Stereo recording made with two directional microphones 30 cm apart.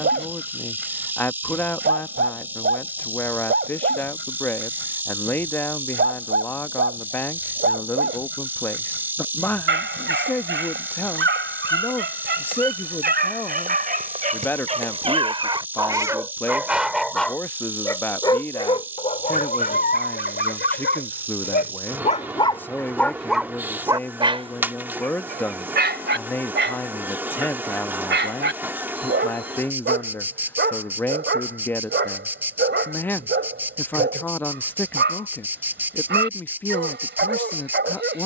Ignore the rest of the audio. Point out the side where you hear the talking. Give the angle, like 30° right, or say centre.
10° left.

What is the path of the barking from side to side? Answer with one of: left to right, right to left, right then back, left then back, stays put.
left then back.